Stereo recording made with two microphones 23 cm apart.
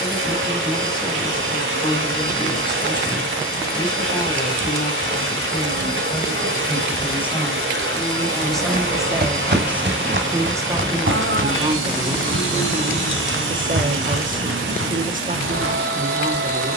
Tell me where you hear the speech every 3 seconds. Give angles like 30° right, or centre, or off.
20° left, 20° left, 10° left, 10° right, 30° right, 40° right.